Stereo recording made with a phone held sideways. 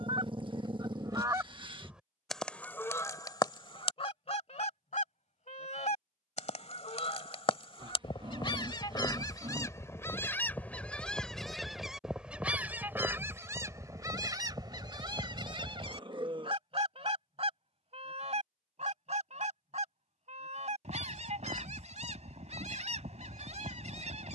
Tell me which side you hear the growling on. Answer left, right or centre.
right.